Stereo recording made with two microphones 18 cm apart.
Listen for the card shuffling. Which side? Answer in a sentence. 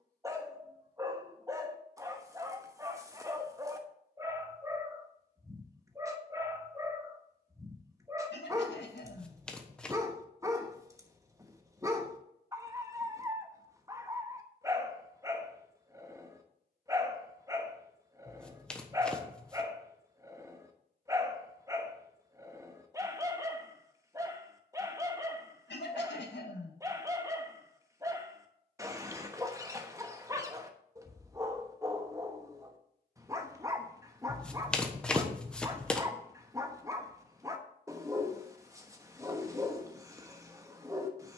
In this clip you hear the card shuffling in the centre.